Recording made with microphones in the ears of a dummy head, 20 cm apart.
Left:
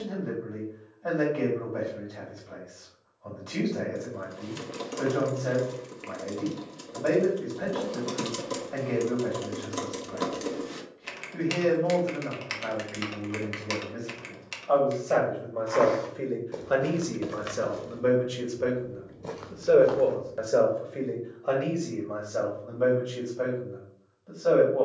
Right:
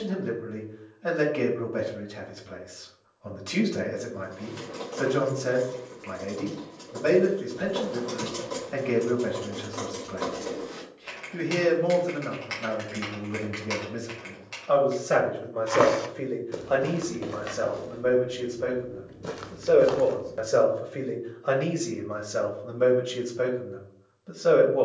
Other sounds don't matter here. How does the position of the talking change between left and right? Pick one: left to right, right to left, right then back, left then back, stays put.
left then back.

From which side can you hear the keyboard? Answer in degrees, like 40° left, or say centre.
50° left.